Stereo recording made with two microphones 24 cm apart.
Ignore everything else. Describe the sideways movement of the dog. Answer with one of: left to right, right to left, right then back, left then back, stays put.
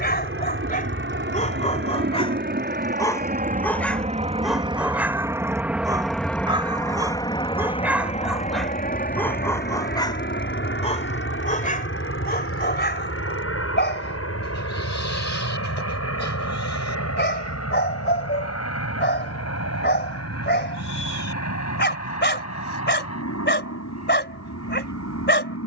right then back.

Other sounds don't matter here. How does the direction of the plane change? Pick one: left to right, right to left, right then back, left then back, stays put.
right to left.